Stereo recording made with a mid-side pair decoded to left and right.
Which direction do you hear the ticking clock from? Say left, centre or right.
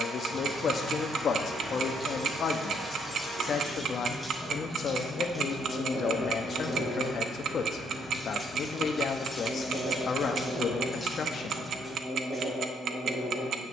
right.